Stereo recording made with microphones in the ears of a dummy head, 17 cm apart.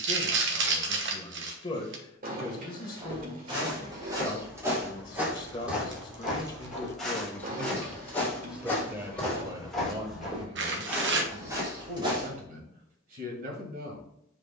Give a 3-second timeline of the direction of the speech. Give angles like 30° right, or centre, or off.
20° left, 20° left, 10° left, 30° right, 50° right.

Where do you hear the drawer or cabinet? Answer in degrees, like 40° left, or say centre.
50° right.